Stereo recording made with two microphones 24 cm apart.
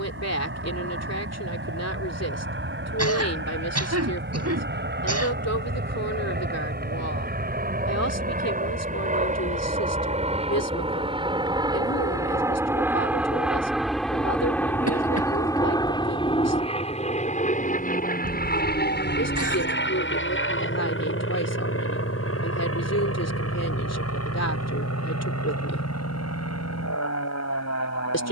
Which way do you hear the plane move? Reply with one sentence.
You can hear the plane travel towards the left.